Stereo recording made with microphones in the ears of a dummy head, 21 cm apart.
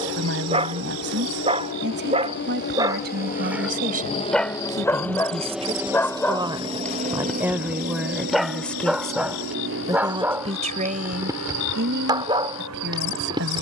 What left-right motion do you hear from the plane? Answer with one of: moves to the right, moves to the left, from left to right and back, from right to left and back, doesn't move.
moves to the right.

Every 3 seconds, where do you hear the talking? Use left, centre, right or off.
right, right, centre, right, right.